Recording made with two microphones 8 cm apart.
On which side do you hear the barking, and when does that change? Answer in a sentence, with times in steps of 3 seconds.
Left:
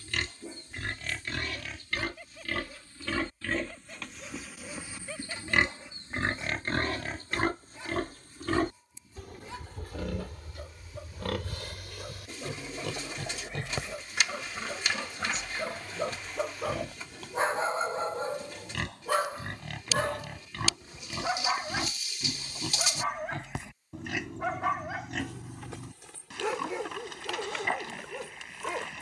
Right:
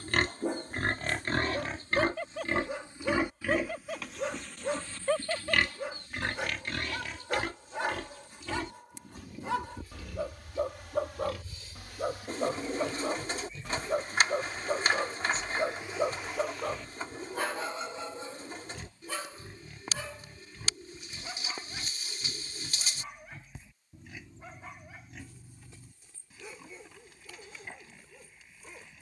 You can hear the barking on the right from 0 s, in the centre from 15 s and on the left from 18 s.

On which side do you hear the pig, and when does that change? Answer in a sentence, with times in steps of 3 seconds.
In this clip you hear the pig on the right from 0 s, in the centre from 3 s and on the left from 6 s.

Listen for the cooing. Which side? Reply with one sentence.
You can hear the cooing on the right.